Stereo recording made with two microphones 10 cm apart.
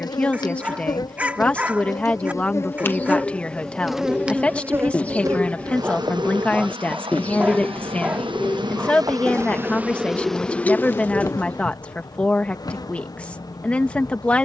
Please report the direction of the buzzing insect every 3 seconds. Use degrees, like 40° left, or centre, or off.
40° left, 20° right, 50° right, 10° left, 40° left.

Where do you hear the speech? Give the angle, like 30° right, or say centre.
10° left.